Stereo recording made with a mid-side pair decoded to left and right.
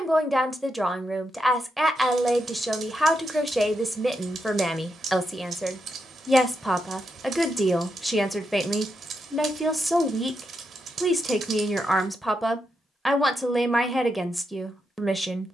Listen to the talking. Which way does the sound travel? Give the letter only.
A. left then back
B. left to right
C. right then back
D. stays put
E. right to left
D.